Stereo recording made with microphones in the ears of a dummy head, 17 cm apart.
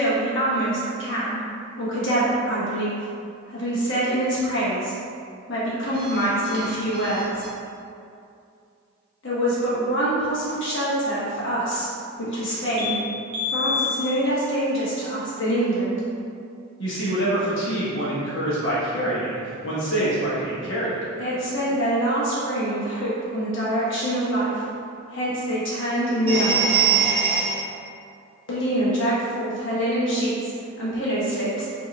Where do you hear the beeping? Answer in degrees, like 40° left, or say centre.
20° right.